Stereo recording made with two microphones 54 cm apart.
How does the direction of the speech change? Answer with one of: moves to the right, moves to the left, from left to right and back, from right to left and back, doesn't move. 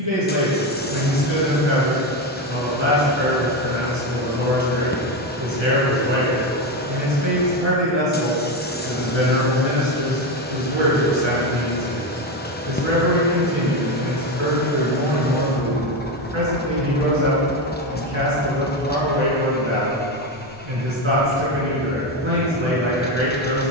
doesn't move.